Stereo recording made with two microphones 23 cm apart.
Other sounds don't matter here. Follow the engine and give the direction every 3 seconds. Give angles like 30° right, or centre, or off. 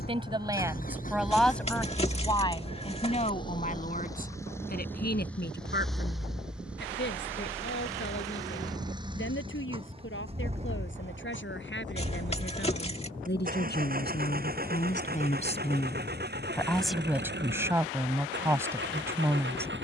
40° left, 10° left, 10° right, 30° right, 40° right, 40° right, 50° right.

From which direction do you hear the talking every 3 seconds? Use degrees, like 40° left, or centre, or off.
centre, 40° left, 50° left, 60° left, 50° left, 10° left, 10° right.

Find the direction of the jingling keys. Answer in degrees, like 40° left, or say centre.
30° left.